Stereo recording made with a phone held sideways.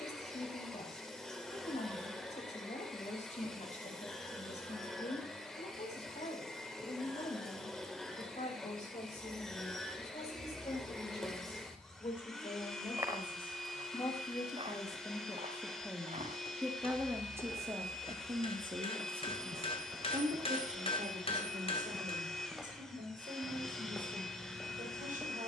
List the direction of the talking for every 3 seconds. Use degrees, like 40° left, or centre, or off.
60° left, 60° left, 60° left, 50° left, 40° left, centre, 50° right, 70° right, 80° right.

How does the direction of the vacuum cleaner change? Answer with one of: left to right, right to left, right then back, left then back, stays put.
stays put.